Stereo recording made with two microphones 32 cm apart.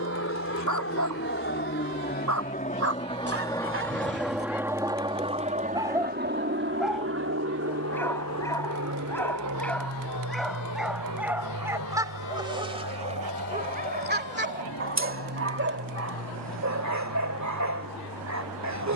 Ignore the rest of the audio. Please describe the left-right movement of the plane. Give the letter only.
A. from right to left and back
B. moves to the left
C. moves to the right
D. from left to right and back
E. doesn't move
C.